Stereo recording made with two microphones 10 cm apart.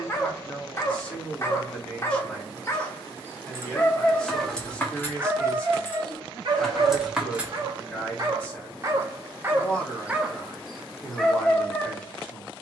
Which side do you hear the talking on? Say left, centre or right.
centre.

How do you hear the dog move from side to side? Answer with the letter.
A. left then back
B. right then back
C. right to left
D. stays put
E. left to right
B.